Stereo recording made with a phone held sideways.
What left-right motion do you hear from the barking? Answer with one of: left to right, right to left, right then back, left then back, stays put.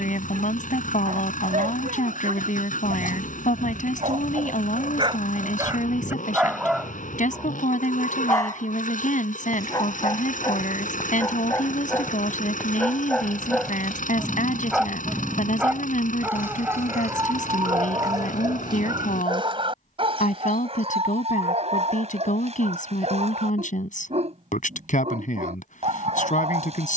left then back.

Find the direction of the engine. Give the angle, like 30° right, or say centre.
60° left.